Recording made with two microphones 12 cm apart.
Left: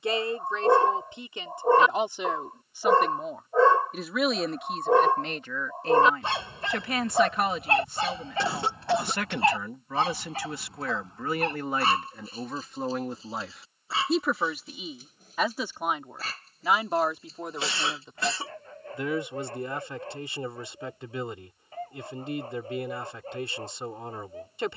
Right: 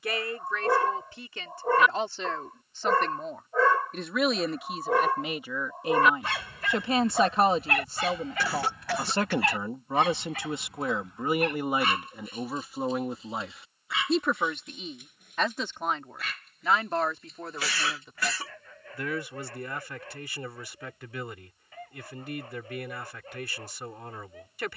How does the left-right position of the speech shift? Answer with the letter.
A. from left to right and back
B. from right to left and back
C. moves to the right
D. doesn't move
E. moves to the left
A.